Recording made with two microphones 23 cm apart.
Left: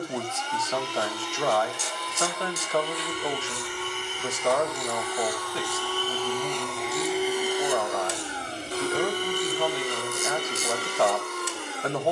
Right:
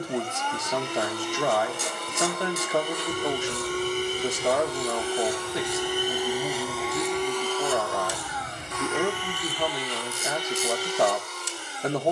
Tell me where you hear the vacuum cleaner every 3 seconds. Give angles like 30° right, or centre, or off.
50° right, 30° right, 10° left, 50° left.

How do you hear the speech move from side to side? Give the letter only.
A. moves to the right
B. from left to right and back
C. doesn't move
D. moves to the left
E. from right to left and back
C.